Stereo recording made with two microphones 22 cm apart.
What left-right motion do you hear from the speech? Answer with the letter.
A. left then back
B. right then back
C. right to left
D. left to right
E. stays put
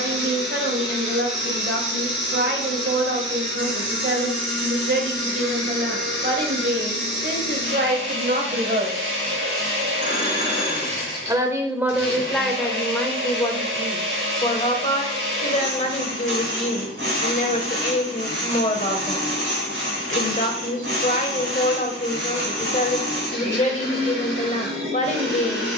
C.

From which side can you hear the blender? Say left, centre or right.
right.